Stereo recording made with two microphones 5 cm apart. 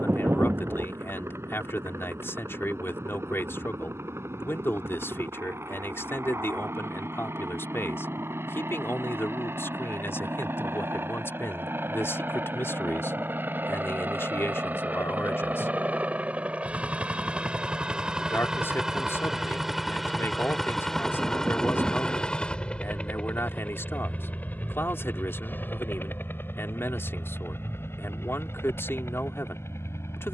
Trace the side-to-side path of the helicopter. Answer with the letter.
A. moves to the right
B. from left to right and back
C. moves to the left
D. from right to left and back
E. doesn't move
C.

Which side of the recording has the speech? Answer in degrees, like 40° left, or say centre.
50° left.